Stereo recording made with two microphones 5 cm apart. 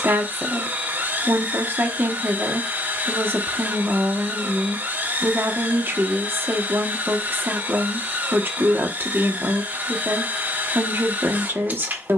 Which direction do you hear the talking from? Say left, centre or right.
right.